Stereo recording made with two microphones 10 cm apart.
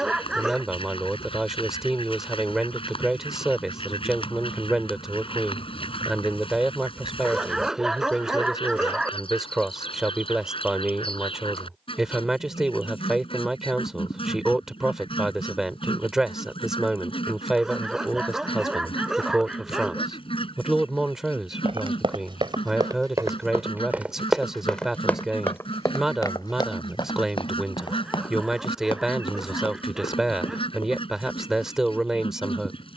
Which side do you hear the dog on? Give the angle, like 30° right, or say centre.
10° right.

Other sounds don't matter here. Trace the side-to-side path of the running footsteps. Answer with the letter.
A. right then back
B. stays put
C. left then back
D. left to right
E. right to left
E.